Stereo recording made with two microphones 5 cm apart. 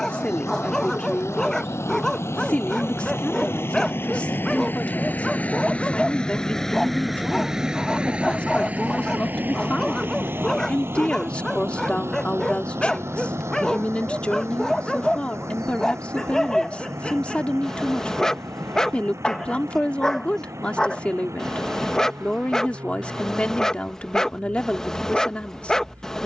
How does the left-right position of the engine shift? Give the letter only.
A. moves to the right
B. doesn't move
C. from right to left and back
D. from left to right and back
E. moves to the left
A.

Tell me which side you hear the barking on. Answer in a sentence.
In this clip you hear the barking in the centre.